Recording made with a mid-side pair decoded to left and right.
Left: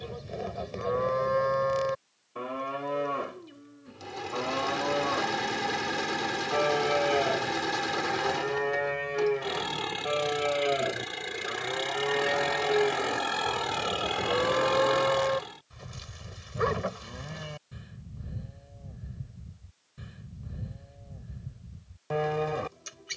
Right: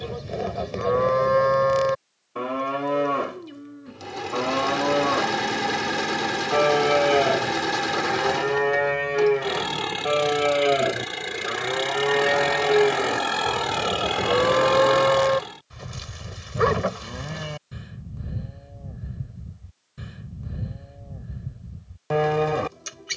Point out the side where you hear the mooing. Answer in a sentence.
You can hear the mooing on the right.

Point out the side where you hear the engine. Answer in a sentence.
In this clip you hear the engine on the right.